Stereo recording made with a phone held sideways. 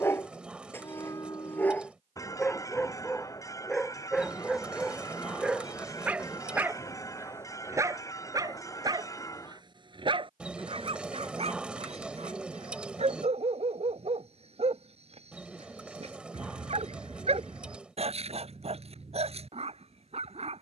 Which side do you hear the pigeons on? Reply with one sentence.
In this clip you hear the pigeons in the centre.